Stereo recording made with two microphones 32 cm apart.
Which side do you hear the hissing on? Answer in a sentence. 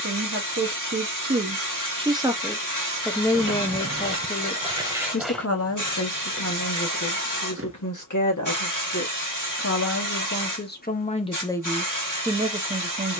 You can hear the hissing on the left.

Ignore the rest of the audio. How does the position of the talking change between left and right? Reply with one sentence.
In this clip you hear the talking move from right to left and back again.